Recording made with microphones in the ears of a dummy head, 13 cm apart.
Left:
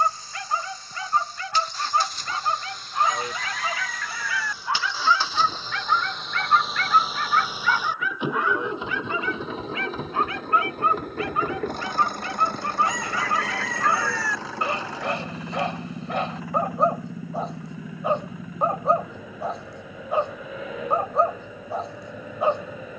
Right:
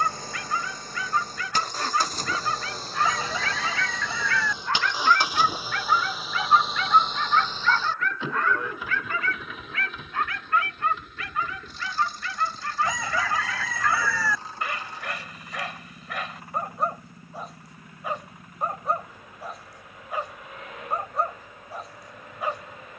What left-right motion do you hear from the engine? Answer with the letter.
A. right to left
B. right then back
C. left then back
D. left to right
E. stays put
A.